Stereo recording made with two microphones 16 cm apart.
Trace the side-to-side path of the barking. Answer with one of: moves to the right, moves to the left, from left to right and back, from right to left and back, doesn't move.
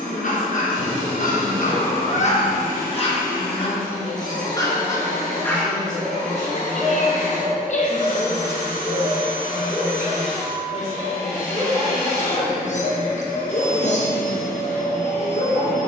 from left to right and back.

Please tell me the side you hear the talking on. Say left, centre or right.
left.